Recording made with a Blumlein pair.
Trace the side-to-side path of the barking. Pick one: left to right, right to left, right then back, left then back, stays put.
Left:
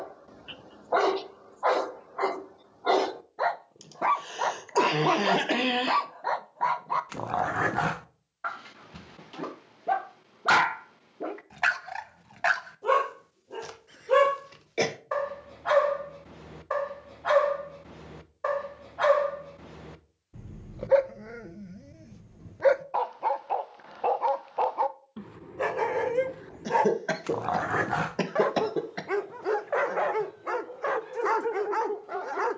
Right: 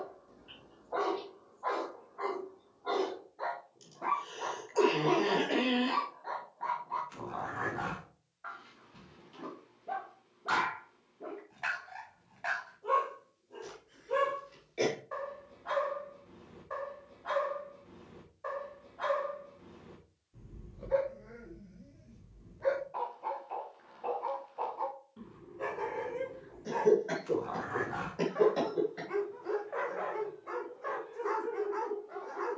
stays put.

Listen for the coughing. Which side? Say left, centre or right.
left.